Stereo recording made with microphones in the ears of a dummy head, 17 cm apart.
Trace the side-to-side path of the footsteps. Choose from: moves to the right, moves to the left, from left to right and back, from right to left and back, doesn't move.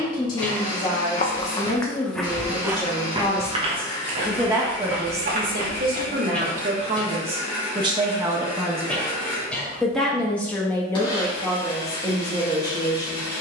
moves to the right.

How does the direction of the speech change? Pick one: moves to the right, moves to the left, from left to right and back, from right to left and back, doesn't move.
from left to right and back.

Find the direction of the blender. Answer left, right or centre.
left.